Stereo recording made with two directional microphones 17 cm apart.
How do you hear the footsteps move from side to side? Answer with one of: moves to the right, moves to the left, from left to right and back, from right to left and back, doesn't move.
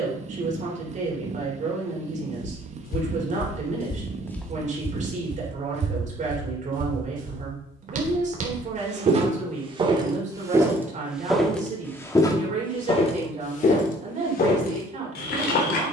from left to right and back.